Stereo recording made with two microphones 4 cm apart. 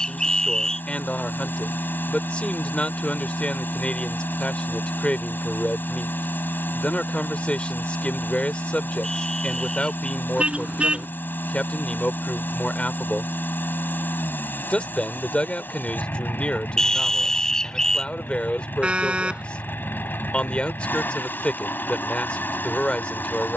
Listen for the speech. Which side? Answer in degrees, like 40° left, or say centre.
30° left.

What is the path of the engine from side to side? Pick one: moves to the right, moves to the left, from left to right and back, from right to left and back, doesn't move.
doesn't move.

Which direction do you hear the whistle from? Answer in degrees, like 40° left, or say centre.
10° left.